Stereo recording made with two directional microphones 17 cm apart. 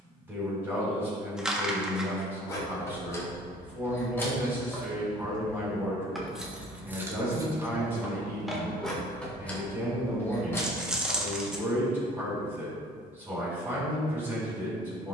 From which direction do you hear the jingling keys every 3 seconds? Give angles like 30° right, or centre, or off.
20° left, 10° left, 10° right, 10° left, off.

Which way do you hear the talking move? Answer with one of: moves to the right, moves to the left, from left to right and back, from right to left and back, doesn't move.
doesn't move.